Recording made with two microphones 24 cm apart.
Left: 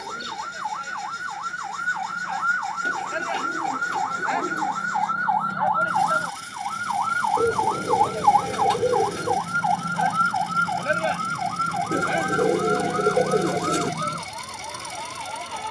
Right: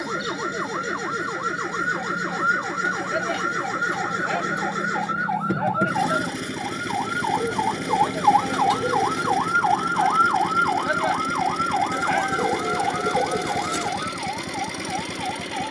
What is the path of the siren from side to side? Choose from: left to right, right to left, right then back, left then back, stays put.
right to left.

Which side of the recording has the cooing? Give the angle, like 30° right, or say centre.
30° left.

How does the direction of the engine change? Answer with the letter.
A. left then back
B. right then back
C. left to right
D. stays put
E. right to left
D.